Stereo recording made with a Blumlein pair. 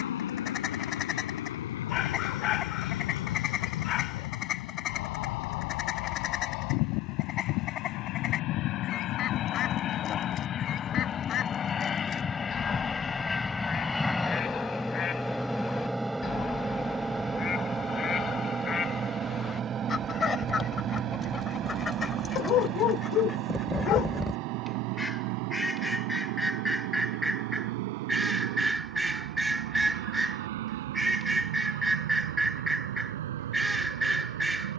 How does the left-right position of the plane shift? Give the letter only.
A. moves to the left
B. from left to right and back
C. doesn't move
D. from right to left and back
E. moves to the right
E.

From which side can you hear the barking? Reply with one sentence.
You can hear the barking on the left.